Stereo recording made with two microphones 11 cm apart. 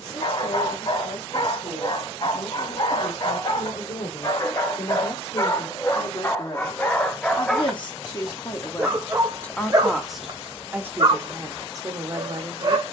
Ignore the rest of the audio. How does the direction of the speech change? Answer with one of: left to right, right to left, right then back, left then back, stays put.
left to right.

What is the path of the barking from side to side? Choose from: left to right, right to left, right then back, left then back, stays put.
left to right.